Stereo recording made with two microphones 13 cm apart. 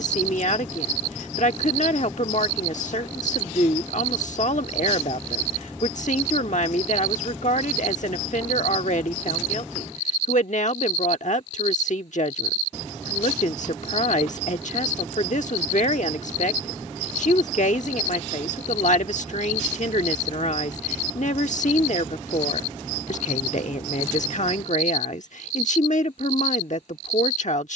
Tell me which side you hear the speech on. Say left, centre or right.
left.